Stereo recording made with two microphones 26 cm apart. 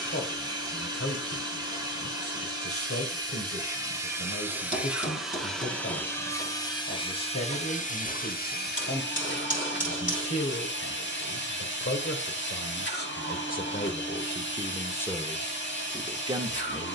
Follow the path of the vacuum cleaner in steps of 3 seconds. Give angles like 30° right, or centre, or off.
20° right, 10° right, 20° left, 40° left, 40° left, 40° left.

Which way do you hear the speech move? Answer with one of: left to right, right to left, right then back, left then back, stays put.
left to right.